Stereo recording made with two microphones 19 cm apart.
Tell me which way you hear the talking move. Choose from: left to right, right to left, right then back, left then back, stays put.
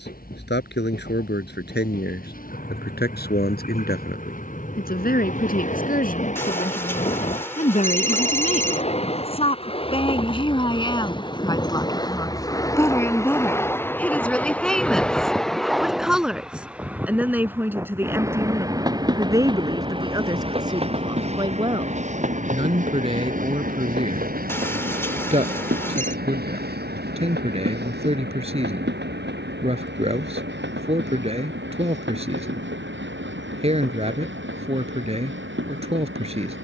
left to right.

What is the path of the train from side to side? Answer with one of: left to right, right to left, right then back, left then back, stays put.
left to right.